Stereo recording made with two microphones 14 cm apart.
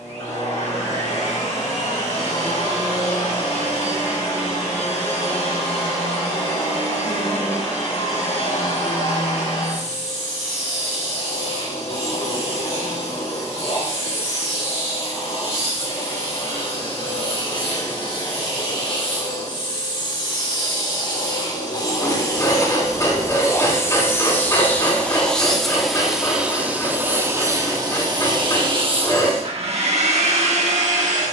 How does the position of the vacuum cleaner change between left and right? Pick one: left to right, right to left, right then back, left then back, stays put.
left to right.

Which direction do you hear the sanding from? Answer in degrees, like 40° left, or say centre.
30° left.